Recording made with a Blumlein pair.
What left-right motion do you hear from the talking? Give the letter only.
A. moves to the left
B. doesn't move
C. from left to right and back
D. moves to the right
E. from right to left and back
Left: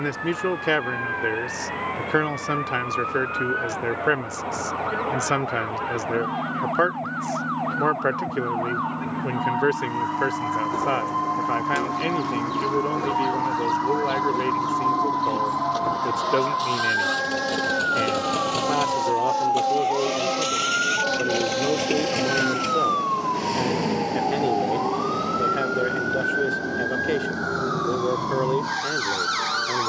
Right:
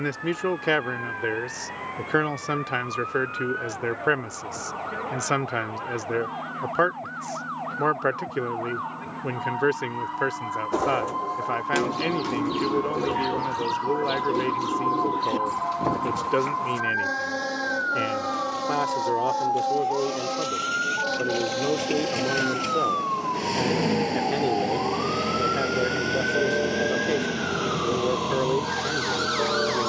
B.